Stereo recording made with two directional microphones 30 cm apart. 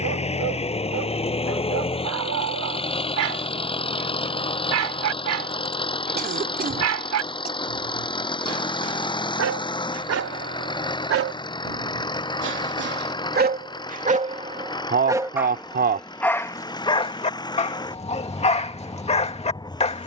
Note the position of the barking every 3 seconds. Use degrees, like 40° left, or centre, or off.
60° right, 60° right, 60° right, 50° right, 30° right, 10° left, 20° left.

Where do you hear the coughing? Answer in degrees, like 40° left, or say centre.
30° right.